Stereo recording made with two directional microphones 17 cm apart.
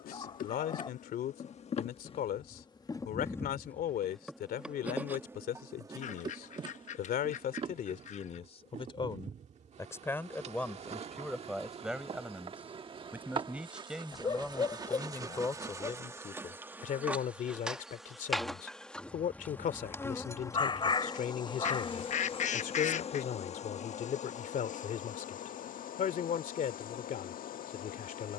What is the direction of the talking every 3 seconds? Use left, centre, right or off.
left, left, left, centre, centre, left, left, left, left, left.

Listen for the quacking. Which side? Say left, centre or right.
left.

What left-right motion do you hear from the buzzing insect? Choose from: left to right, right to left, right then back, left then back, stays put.
right then back.